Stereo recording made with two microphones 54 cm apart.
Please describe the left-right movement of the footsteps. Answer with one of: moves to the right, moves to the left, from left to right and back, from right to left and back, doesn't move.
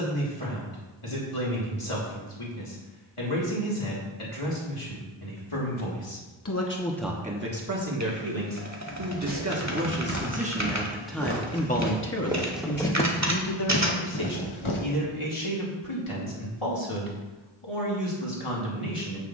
moves to the left.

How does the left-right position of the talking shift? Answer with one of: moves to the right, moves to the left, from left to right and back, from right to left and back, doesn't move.
from left to right and back.